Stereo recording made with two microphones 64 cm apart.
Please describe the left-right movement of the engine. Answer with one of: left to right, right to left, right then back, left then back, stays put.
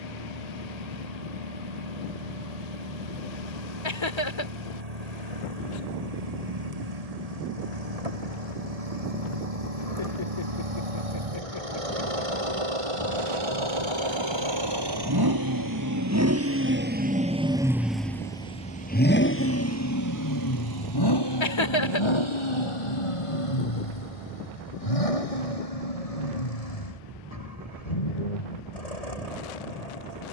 right to left.